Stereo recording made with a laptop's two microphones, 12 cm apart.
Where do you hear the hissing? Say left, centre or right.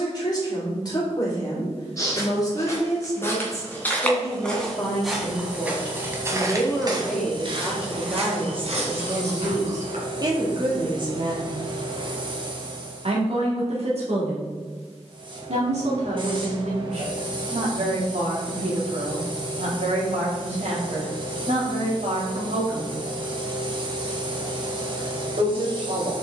right.